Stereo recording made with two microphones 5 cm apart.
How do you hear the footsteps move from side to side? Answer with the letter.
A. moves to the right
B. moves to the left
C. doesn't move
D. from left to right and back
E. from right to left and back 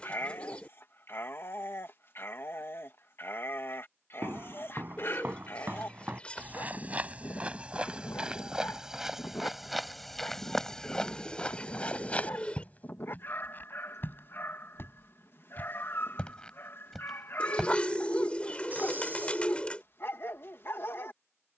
E.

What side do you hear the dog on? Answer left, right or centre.
left.